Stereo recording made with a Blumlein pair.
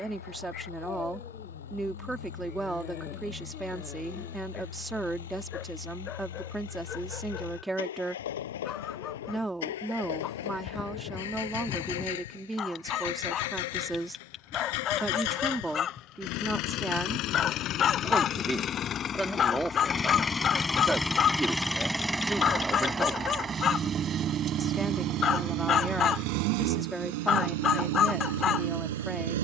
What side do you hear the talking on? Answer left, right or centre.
centre.